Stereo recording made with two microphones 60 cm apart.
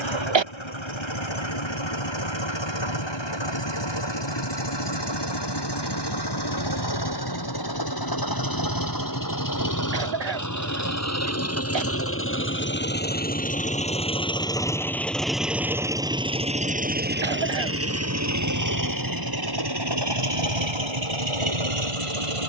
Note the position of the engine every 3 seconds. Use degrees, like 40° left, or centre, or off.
50° left, 40° left, 40° left, 30° left, 10° left, 10° right, 40° right, 50° right.